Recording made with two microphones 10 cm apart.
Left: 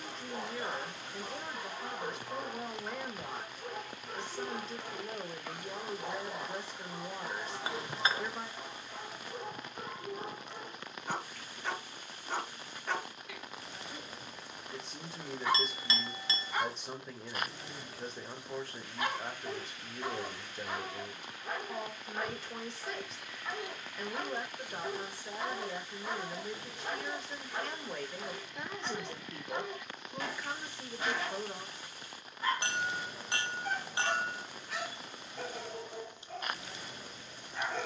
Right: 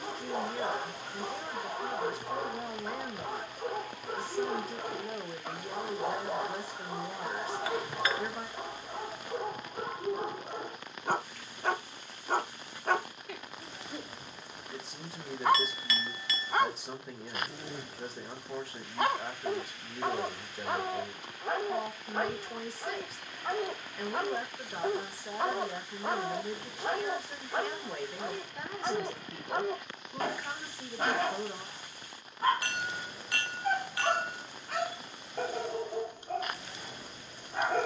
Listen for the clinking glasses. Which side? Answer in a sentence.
You can hear the clinking glasses on the left.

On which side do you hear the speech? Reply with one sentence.
You can hear the speech in the centre.